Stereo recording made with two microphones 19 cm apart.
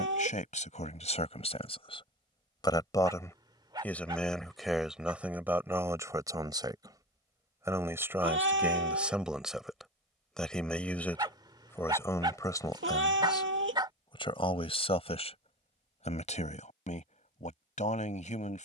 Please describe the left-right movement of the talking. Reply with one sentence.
In this clip you hear the talking move from left to right and back again.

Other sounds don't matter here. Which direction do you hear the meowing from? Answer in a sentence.
You can hear the meowing on the right.